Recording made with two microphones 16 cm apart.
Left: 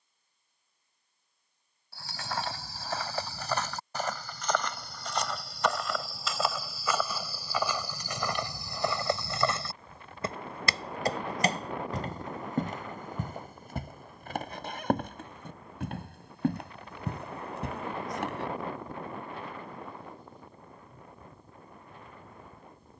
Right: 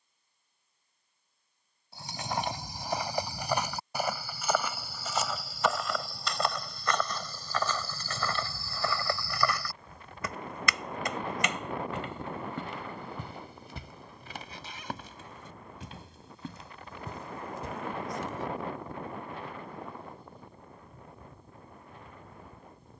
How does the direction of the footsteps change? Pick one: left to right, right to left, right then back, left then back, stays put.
right to left.